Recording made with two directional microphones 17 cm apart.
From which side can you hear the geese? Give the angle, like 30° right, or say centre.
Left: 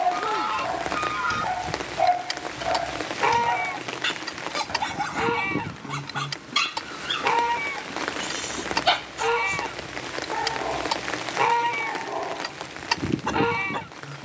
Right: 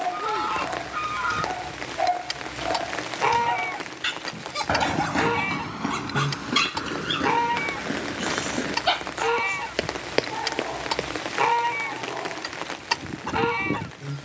centre.